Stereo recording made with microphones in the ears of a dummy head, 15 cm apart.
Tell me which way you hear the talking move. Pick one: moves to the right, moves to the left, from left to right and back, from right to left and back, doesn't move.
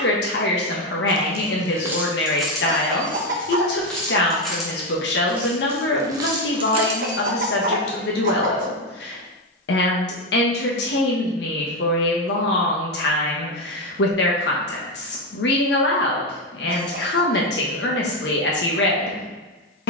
doesn't move.